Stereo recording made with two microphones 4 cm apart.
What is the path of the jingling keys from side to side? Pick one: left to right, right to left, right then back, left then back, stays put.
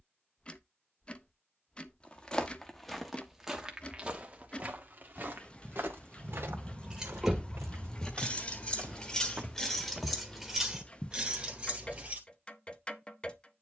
left then back.